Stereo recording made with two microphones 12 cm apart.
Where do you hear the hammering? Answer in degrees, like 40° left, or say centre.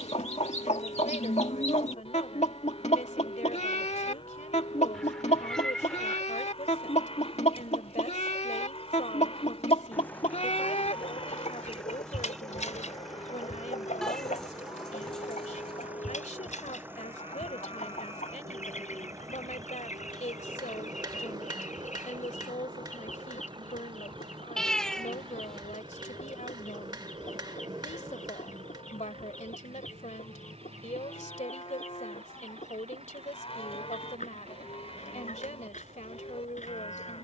40° right.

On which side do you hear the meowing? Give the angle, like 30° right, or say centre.
centre.